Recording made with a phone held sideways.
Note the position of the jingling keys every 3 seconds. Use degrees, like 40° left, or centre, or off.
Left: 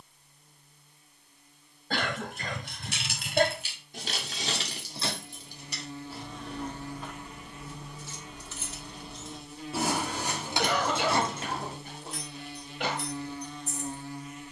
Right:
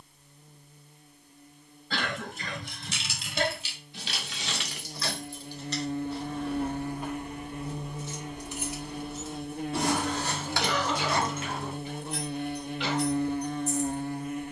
60° left, 30° left, 10° right, 20° left, 50° left.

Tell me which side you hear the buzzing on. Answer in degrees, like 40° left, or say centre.
50° right.